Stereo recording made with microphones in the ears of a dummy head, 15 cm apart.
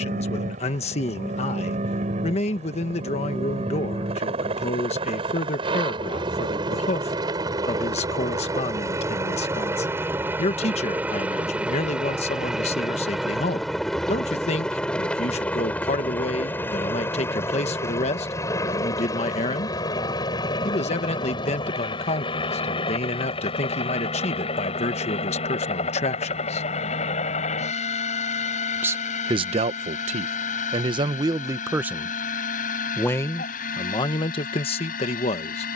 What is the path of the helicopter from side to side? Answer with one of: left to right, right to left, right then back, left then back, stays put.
right to left.